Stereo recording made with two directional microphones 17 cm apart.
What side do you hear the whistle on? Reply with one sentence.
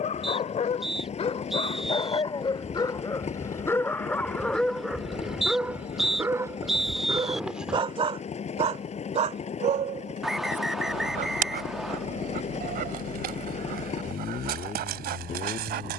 In this clip you hear the whistle in the centre.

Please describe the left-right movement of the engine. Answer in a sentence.
In this clip you hear the engine stay put.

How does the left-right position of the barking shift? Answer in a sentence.
You can hear the barking go from the left side to the right.